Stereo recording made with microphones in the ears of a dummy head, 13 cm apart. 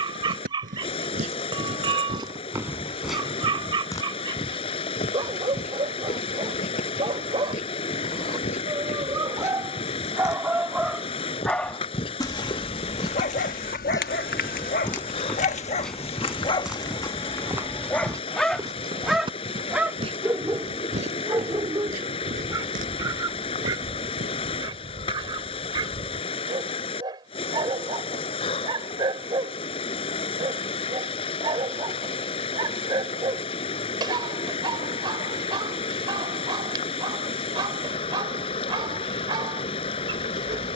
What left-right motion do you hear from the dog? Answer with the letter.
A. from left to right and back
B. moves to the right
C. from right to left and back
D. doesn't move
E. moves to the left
C.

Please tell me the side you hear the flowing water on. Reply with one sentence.
In this clip you hear the flowing water on the left.